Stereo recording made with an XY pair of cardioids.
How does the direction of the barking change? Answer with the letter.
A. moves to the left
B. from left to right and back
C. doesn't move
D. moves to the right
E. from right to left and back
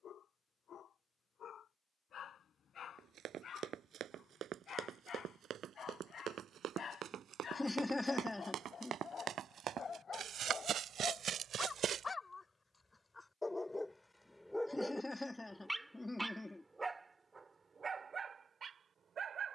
D.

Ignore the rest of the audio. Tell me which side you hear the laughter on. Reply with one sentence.
You can hear the laughter in the centre.